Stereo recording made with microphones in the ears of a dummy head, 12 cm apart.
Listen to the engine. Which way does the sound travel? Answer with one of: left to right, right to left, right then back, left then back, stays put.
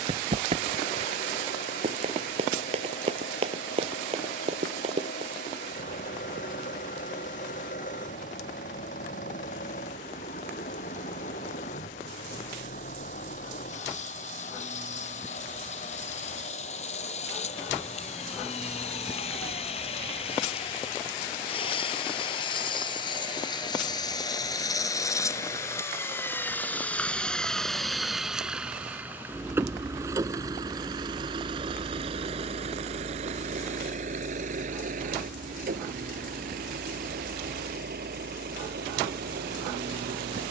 left to right.